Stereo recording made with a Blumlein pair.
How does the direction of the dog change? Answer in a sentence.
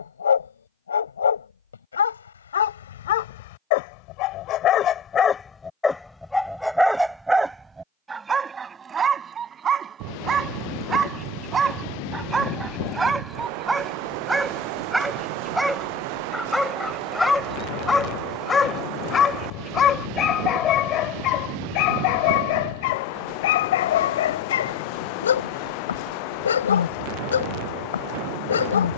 You can hear the dog move from left to right and back again.